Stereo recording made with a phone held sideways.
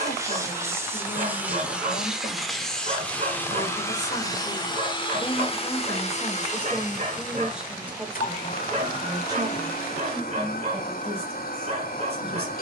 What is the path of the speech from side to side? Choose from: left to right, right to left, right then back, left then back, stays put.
left to right.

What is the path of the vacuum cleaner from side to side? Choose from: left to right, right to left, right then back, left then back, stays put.
right to left.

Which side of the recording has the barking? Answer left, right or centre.
right.